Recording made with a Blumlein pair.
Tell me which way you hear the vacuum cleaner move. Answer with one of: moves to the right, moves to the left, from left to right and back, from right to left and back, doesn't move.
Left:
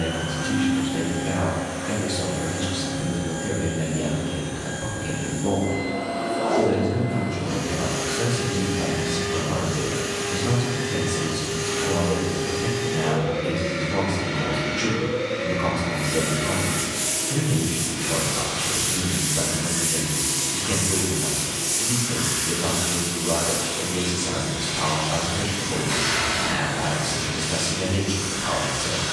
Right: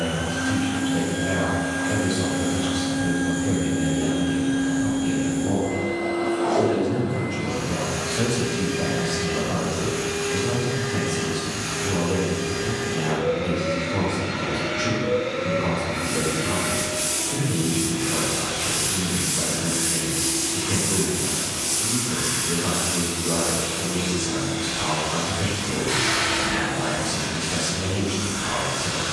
moves to the left.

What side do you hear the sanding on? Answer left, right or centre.
centre.